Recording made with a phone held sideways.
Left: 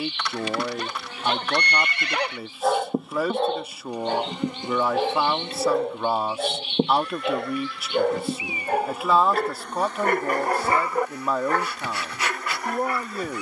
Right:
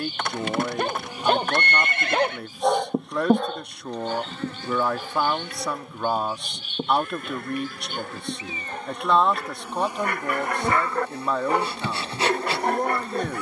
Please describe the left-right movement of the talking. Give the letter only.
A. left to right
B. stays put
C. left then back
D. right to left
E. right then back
B.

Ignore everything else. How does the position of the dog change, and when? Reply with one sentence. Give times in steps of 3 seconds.
You can hear the dog on the right from 0 s, on the left from 3 s and on the right from 12 s.